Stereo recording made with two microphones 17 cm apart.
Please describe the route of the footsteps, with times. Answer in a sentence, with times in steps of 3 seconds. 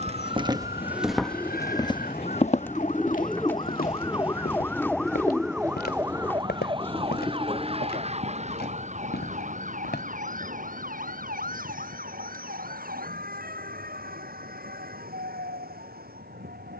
You can hear the footsteps in the centre from 0 s, on the left from 3 s and not at all from 12 s.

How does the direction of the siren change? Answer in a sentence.
In this clip you hear the siren move from left to right.